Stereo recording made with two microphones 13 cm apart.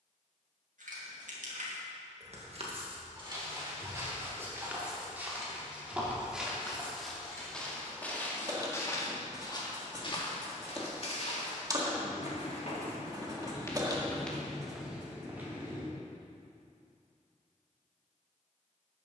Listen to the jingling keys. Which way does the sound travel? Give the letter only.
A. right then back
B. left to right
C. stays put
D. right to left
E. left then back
D.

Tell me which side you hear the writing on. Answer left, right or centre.
right.